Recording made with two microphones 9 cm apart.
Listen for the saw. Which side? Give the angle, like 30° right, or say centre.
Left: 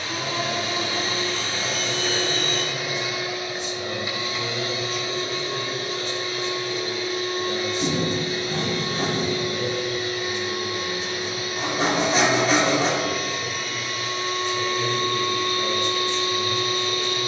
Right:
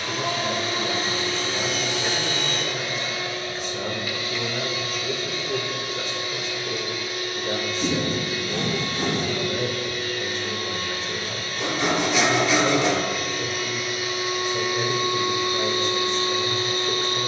40° left.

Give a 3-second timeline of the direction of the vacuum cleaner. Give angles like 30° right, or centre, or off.
20° right, 30° left, 30° left, 20° left, centre, 30° right.